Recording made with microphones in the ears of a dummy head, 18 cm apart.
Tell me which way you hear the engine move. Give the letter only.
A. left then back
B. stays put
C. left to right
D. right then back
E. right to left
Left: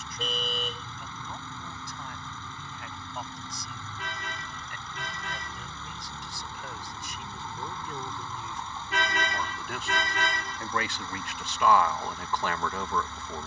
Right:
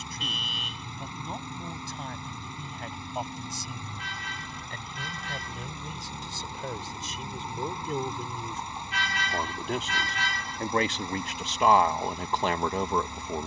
B.